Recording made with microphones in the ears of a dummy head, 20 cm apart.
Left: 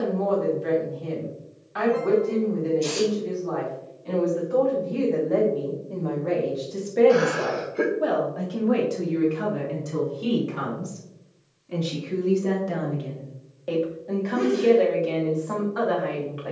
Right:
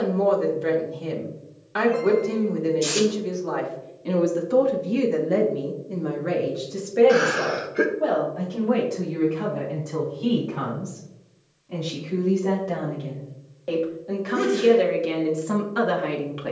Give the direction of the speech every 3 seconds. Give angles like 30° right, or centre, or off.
60° right, 50° right, centre, 30° left, centre, 40° right.